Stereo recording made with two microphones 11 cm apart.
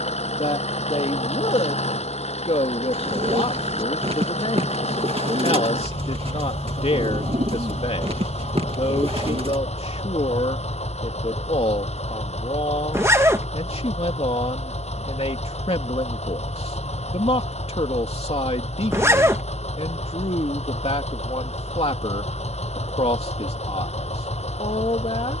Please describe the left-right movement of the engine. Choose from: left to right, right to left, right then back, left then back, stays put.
stays put.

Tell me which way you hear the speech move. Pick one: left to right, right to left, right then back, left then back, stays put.
stays put.